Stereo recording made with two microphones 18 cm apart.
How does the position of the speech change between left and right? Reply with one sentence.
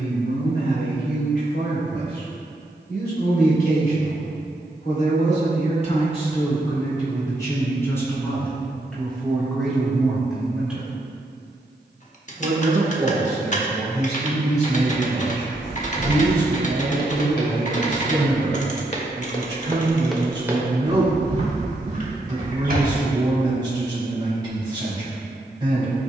You can hear the speech move from left to right.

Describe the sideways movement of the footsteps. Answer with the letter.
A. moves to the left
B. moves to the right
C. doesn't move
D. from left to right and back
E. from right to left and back
B.